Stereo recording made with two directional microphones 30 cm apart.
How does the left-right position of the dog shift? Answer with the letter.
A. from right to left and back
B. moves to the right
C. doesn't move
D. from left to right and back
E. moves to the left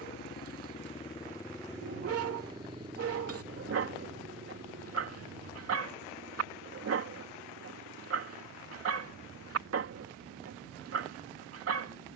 C.